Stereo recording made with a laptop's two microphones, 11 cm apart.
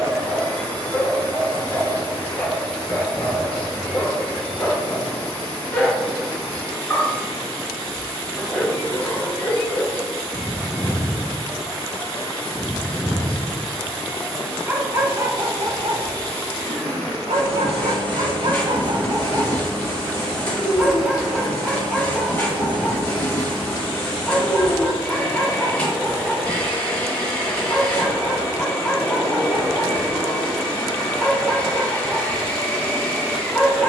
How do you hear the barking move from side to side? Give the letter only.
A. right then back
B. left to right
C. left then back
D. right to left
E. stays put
A.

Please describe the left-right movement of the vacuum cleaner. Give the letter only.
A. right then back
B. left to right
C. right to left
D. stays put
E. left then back
D.